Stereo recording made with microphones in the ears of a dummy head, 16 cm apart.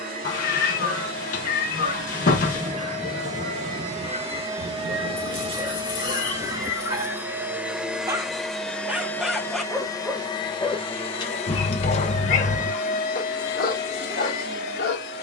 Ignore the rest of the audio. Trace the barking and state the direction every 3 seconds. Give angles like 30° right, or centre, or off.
50° right, 40° right, 20° right, 10° left, 50° left.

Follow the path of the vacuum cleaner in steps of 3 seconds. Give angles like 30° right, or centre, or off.
50° right, 40° right, 10° right, 30° left, 50° left.